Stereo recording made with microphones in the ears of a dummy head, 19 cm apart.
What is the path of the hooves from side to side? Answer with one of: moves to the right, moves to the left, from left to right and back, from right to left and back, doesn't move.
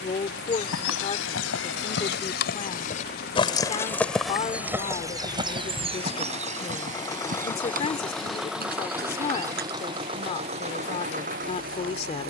moves to the right.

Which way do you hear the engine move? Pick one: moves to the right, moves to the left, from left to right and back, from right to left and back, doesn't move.
moves to the right.